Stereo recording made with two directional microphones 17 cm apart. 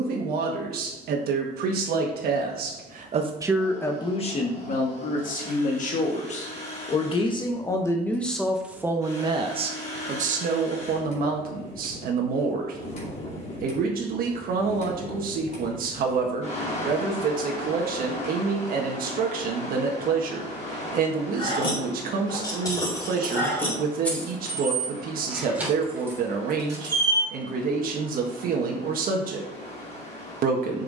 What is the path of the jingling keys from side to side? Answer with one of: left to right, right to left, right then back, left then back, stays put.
left to right.